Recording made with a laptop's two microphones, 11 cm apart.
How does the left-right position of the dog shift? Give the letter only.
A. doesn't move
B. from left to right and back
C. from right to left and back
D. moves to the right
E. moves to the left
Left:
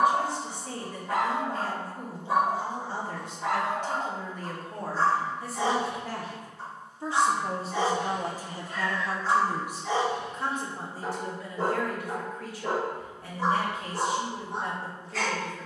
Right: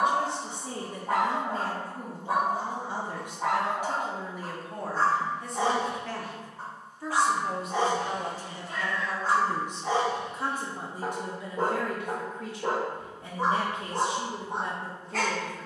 A.